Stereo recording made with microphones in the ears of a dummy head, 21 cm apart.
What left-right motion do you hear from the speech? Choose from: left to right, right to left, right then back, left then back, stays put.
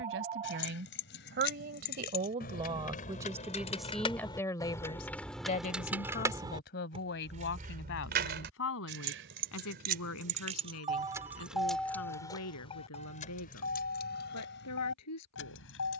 right to left.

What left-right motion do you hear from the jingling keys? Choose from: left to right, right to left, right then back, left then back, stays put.
right then back.